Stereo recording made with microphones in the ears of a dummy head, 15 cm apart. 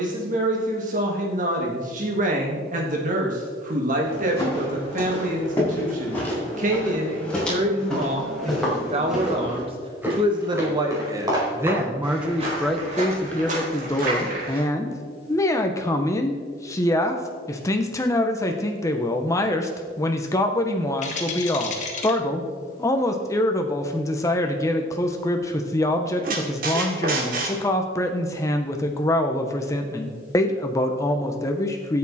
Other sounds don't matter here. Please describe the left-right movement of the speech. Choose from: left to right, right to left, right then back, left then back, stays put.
right to left.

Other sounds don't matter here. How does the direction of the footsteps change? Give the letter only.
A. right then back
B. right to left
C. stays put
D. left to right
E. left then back
D.